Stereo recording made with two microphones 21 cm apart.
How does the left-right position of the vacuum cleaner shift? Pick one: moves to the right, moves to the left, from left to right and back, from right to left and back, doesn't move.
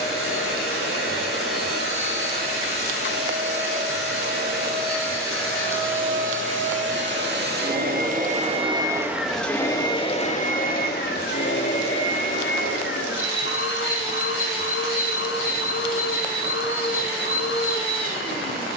moves to the left.